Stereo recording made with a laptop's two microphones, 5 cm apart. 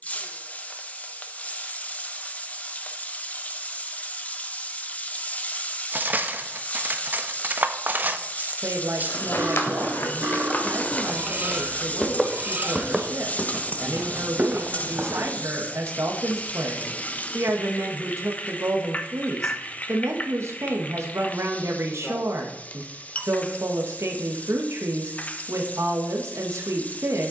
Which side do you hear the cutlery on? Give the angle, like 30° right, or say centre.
40° right.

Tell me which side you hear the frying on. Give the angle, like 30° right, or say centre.
30° left.